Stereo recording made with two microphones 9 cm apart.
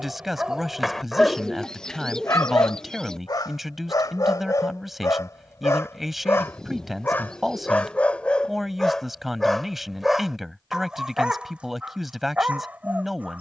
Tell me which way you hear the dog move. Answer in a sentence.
In this clip you hear the dog move from right to left and back again.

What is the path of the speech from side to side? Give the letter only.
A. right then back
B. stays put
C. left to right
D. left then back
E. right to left
B.